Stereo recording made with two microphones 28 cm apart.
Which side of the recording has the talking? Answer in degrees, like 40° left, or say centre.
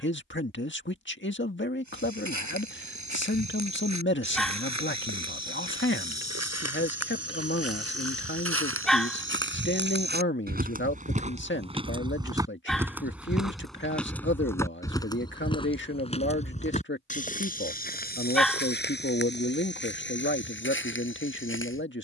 40° left.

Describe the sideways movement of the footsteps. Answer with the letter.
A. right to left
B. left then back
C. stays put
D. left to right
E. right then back
A.